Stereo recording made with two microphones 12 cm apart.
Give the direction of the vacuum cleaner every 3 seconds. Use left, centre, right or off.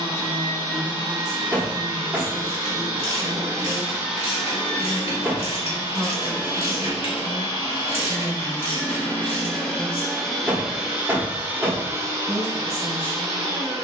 right, centre, left, centre, right.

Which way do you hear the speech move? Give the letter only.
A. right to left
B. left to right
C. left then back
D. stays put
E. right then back
A.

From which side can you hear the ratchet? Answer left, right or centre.
left.